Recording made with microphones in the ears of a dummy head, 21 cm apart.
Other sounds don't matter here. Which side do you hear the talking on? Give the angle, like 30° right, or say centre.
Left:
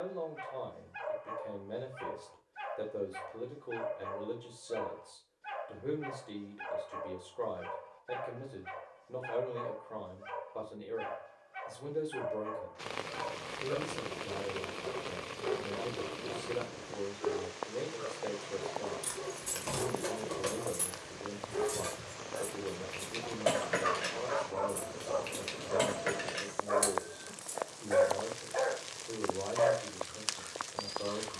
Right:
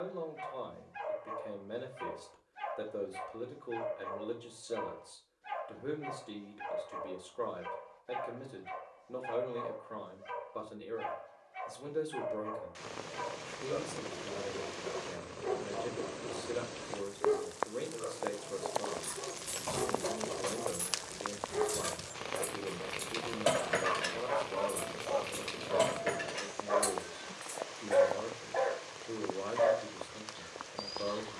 10° right.